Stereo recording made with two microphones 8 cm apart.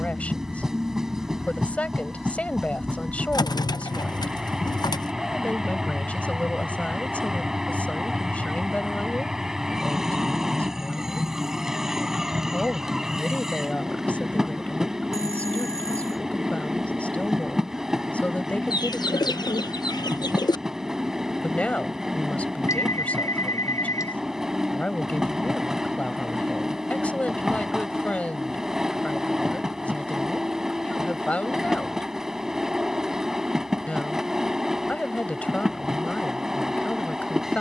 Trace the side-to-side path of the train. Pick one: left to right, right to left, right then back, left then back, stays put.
stays put.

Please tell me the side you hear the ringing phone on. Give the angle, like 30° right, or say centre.
50° left.